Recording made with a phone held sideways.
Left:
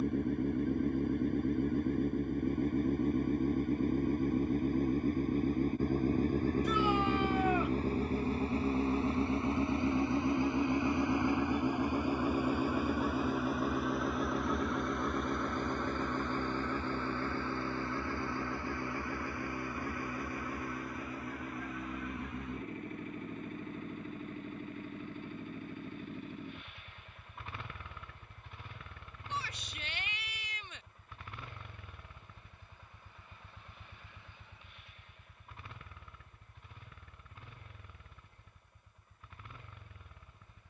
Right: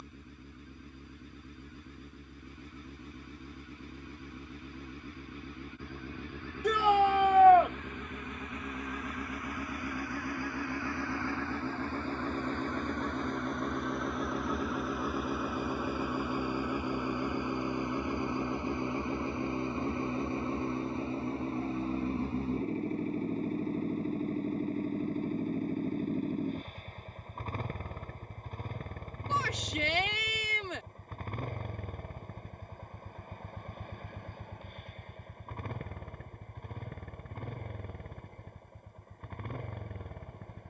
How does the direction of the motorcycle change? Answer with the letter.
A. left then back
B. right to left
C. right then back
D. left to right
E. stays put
D.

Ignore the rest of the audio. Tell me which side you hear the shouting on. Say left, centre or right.
right.